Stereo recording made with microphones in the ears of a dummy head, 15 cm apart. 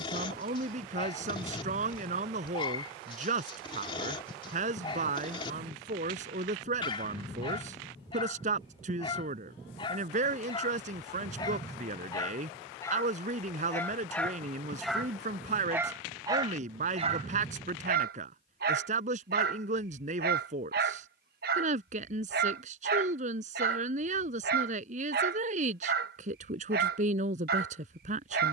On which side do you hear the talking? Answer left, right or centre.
right.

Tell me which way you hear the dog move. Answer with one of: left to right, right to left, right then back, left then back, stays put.
left to right.